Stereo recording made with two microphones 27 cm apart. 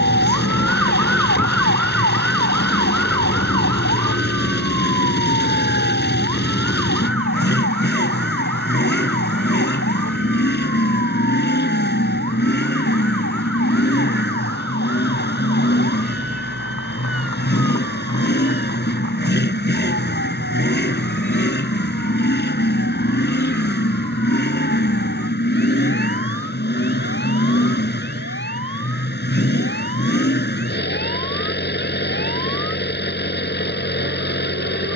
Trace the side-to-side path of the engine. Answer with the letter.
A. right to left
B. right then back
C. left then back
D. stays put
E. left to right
D.